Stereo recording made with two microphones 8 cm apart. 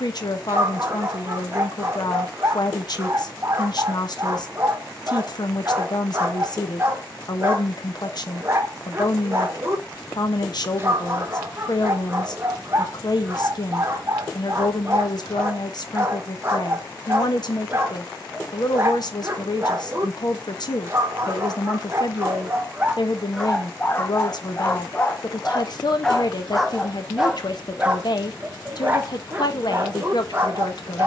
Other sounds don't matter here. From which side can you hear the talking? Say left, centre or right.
left.